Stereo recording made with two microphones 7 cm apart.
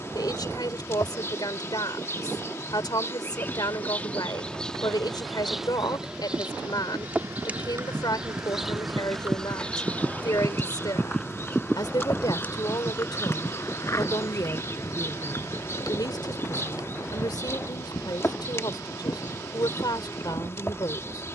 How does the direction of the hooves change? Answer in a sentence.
In this clip you hear the hooves move from right to left.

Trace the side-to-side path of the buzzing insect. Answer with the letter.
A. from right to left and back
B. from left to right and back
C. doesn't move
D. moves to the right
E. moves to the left
B.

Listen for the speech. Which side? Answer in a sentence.
In this clip you hear the speech on the left.